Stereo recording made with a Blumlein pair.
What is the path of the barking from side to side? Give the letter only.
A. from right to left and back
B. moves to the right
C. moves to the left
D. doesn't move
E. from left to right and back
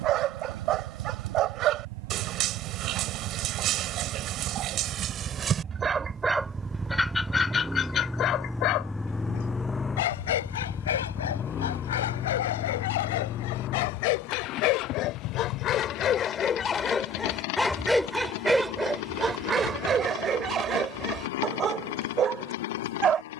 A.